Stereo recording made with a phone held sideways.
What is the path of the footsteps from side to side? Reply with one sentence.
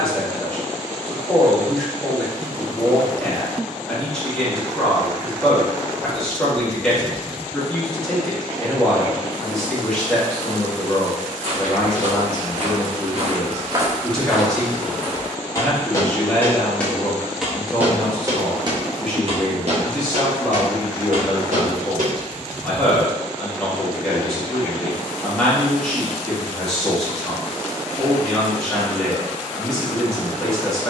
You can hear the footsteps go left and come back.